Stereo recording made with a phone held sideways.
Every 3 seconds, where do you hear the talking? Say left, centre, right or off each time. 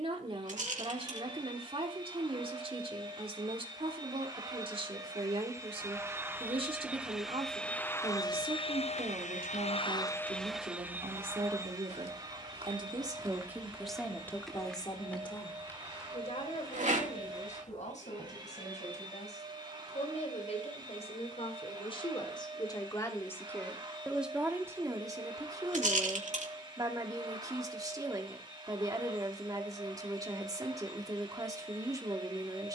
right, right, right, right, centre, left, left, left, right, right, right.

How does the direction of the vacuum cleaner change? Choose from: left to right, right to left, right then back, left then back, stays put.
left then back.